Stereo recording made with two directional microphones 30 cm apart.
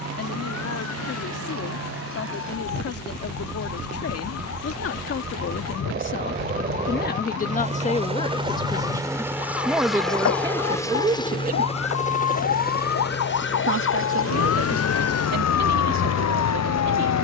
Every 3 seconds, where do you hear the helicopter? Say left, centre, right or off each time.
right, right, right, centre, left, left.